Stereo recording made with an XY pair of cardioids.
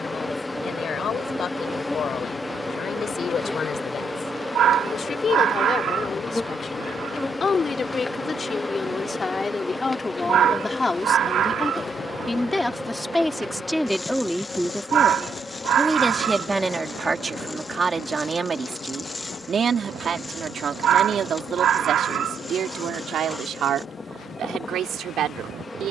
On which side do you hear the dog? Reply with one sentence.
You can hear the dog on the right.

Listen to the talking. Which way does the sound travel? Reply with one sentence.
You can hear the talking go from the left side to the right.